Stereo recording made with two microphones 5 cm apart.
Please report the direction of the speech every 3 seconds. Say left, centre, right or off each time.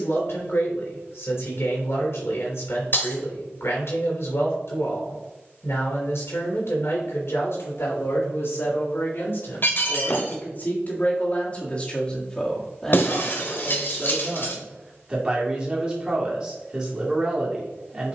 left, left, left, left, centre, right.